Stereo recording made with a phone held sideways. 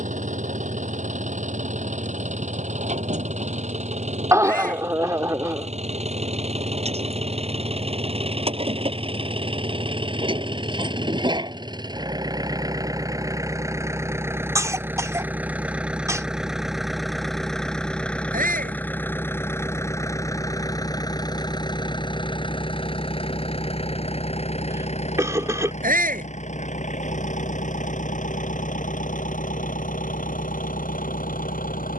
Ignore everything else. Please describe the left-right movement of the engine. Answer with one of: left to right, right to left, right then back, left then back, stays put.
right to left.